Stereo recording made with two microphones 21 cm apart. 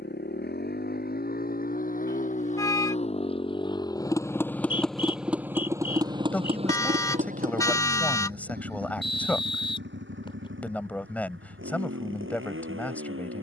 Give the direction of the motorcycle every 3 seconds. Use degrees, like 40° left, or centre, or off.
40° left, 10° left, 40° right, 60° right, 70° right.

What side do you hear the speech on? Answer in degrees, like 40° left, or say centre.
10° left.